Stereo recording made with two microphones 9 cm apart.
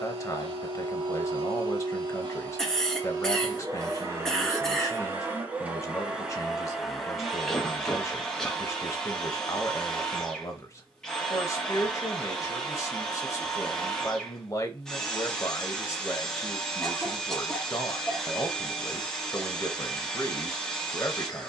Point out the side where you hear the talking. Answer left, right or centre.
left.